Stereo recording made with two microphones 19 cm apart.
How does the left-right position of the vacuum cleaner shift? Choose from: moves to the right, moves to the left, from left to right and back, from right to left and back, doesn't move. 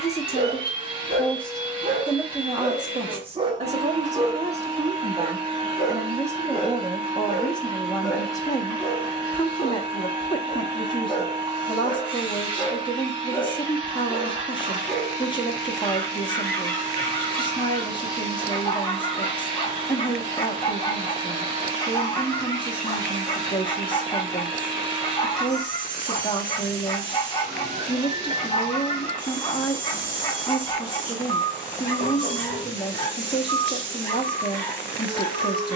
doesn't move.